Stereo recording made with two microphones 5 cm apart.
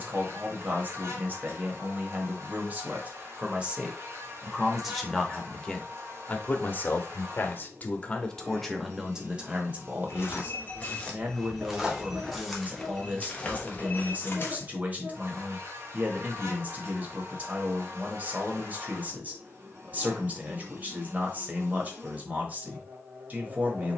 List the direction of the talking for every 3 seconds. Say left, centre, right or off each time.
right, centre, left, right, right, right, right, right.